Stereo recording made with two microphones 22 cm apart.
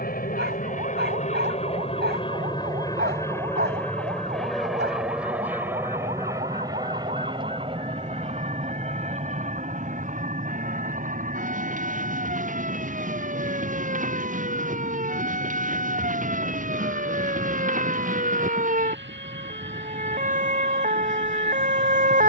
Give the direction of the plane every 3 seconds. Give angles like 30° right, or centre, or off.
30° left, centre, 20° right, 30° right, 40° right, 50° right, 50° right, 50° right.